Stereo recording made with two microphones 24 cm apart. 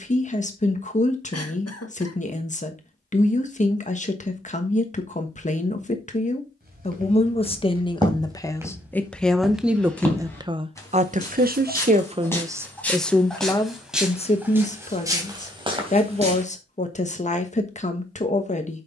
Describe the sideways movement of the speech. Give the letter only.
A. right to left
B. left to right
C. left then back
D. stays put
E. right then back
E.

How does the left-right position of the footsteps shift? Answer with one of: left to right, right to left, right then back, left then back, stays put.
left then back.